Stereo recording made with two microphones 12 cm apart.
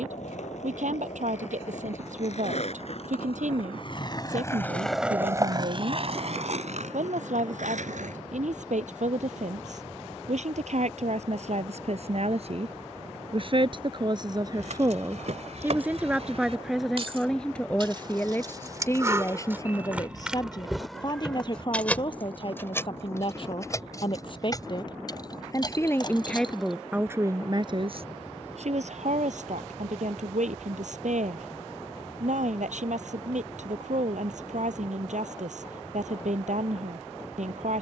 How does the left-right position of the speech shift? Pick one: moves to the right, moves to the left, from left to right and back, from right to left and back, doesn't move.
from right to left and back.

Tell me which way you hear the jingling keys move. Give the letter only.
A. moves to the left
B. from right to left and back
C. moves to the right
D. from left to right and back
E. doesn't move
A.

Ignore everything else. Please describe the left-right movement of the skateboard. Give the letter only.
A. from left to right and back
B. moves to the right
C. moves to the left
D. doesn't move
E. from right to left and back
B.